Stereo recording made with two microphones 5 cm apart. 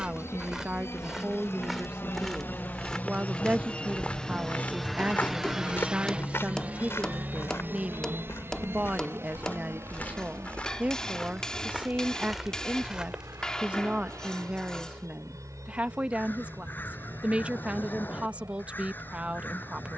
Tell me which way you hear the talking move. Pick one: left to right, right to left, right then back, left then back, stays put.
stays put.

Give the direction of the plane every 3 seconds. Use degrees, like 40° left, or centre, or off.
50° left, 10° left, 30° right, 50° right, 60° right, 70° right, 70° right.